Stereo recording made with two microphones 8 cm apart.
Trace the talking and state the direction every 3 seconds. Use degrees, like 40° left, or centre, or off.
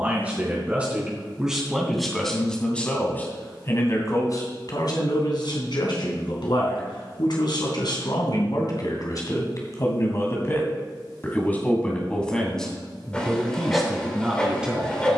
10° right, 50° left, 60° left, 30° left, centre.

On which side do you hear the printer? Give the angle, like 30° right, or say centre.
10° left.